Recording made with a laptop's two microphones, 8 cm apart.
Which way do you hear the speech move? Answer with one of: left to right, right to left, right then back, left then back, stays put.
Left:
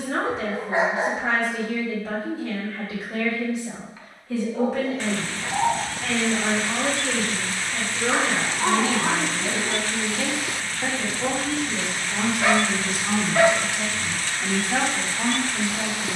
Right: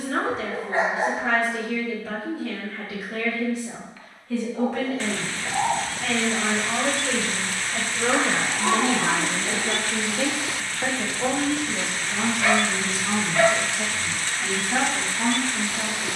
right then back.